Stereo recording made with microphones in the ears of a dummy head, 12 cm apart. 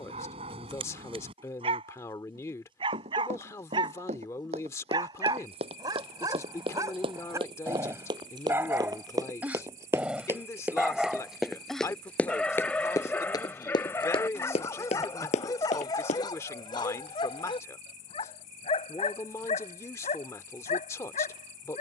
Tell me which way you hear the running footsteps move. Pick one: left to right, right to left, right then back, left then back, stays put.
right to left.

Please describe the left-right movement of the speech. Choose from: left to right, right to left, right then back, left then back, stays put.
stays put.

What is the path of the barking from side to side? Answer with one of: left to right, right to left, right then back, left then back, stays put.
right to left.